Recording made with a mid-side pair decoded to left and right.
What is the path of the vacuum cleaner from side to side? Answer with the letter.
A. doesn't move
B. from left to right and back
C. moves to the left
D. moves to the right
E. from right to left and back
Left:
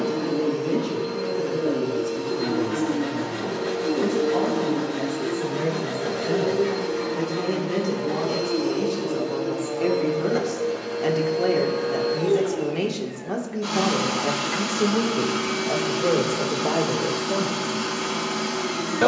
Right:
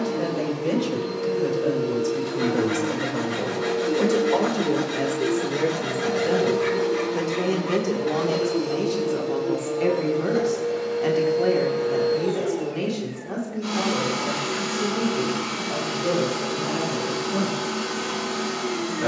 A.